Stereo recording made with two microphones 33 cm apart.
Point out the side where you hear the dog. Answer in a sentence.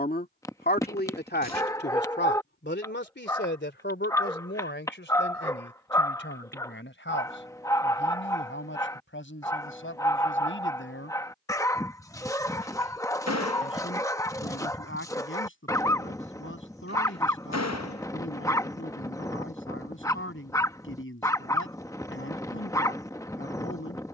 In this clip you hear the dog in the centre.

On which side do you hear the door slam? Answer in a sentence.
In this clip you hear the door slam on the left.